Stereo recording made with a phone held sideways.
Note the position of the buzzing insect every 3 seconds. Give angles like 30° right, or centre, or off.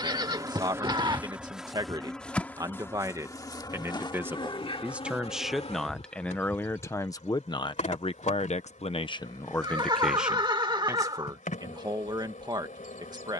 10° right, 30° left, 50° left, 60° left, 60° left.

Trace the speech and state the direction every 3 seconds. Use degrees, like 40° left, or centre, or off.
30° right, 10° right, 30° left, centre, 30° right.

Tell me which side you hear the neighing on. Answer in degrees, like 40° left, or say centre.
30° right.